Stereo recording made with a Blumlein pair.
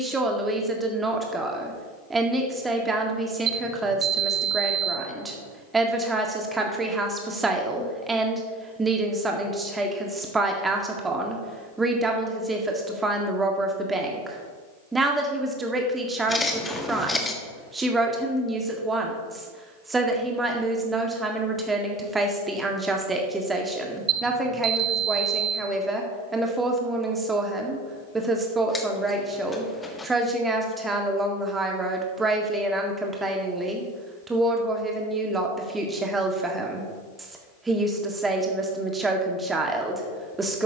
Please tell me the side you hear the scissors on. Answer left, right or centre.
centre.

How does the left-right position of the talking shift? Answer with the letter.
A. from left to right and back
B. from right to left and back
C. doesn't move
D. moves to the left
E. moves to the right
C.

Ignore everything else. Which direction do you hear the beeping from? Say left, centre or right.
right.